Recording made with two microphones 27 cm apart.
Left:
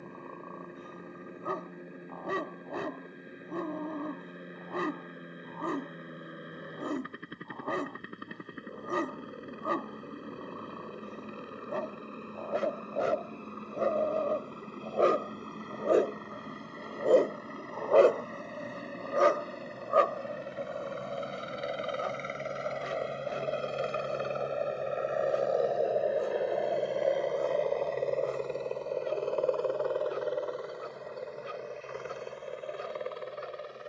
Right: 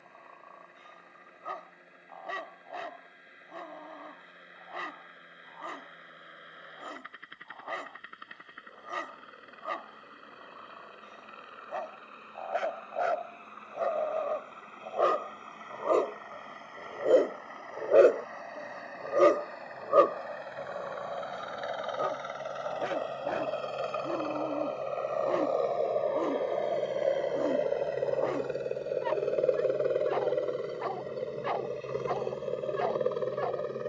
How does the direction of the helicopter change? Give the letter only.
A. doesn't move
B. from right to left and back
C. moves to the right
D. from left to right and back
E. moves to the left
C.